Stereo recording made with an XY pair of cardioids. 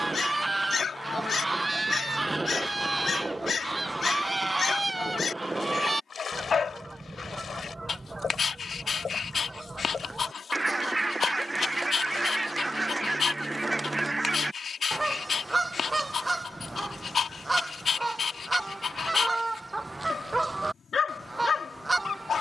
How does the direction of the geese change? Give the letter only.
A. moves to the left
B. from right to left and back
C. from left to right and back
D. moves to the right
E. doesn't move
E.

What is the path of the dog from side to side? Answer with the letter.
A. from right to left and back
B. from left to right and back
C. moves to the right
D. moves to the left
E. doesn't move
E.